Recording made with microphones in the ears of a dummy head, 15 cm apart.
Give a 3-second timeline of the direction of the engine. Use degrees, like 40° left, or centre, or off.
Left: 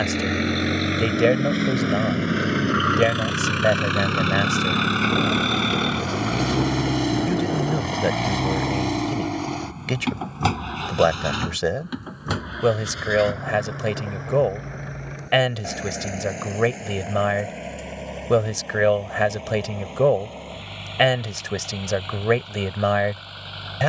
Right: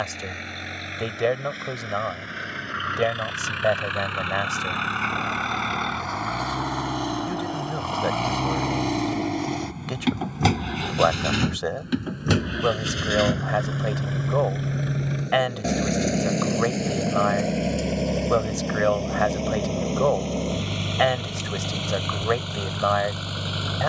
70° left, 50° left, 20° left, 20° right, 40° right, 50° right, 50° right, 60° right.